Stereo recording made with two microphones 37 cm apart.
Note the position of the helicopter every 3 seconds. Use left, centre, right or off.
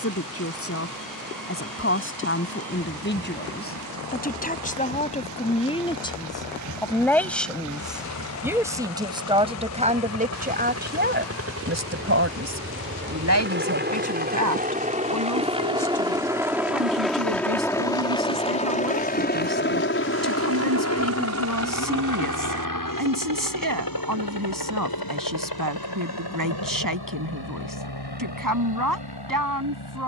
right, right, right, right, right, centre, left, left, left, left.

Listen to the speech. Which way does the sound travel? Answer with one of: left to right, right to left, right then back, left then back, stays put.
left to right.